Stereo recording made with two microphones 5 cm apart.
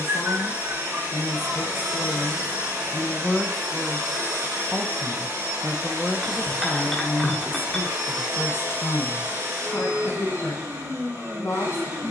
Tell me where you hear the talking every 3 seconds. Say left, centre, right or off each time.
left, centre, left, left.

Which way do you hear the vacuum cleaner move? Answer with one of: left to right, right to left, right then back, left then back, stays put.
stays put.